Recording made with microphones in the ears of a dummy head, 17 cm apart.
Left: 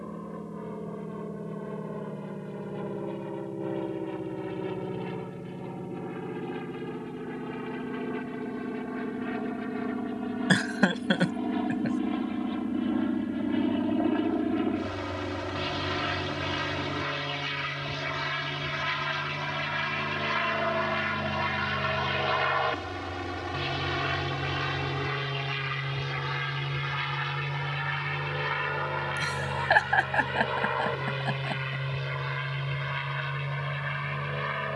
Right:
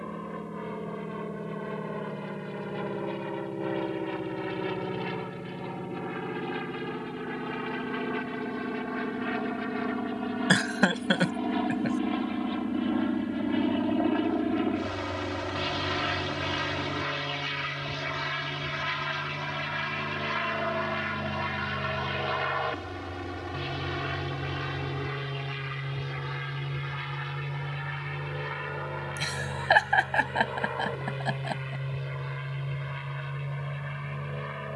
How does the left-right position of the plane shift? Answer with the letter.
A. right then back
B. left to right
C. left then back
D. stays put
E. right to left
E.